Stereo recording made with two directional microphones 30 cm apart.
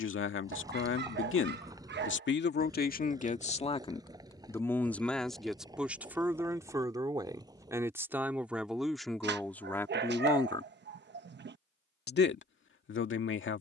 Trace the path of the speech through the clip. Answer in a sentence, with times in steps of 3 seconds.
You can hear the speech on the left from 0 s, in the centre from 3 s and on the left from 12 s.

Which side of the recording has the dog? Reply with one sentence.
You can hear the dog on the right.